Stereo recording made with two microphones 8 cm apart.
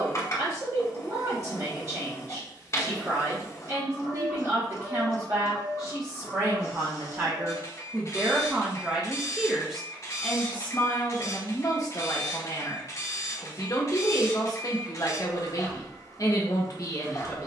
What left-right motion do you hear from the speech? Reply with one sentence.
You can hear the speech travel towards the left.